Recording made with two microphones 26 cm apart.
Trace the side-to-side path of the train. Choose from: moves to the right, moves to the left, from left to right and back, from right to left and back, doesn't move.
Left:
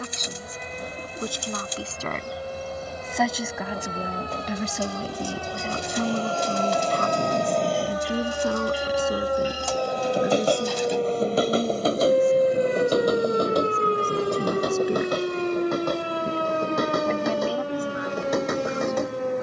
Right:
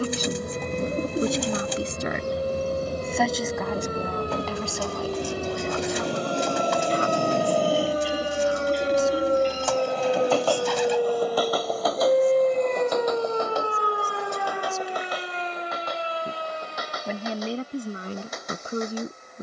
moves to the left.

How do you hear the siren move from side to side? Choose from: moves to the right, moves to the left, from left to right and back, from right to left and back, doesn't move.
moves to the left.